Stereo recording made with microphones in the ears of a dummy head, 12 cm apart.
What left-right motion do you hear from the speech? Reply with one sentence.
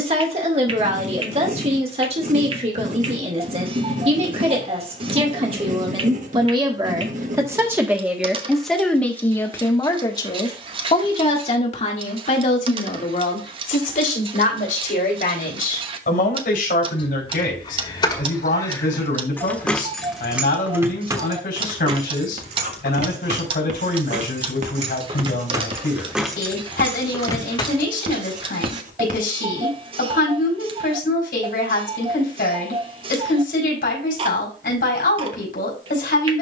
You can hear the speech travel towards the left.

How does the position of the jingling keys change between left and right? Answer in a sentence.
In this clip you hear the jingling keys move from left to right and back again.